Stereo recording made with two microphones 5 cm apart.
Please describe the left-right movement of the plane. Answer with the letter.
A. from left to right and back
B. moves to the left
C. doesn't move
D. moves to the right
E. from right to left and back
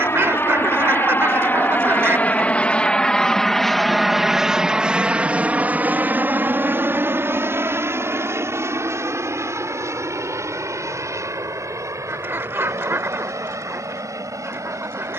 D.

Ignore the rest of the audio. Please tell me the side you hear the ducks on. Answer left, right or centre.
right.